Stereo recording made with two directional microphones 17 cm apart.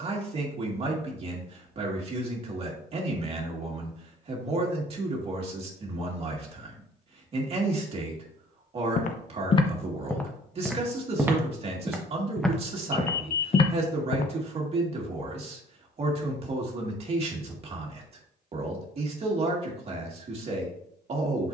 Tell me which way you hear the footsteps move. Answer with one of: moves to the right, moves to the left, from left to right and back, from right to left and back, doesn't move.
from left to right and back.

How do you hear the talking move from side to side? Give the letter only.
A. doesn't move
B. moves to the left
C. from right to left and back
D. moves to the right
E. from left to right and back
A.